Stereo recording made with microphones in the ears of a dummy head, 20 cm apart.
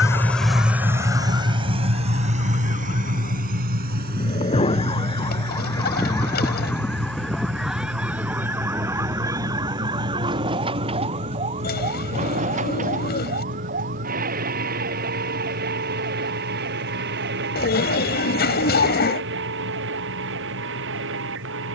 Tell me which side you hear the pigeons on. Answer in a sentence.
In this clip you hear the pigeons on the left.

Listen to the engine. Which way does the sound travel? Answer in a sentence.
In this clip you hear the engine travel towards the right.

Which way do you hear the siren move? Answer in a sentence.
In this clip you hear the siren move to the right.